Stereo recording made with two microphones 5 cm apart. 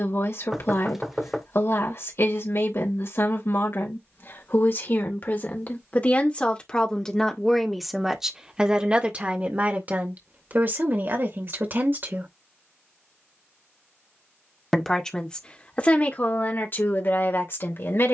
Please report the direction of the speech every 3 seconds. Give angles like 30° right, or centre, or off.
60° left, 50° left, 10° left, 40° right, 10° right, 40° left.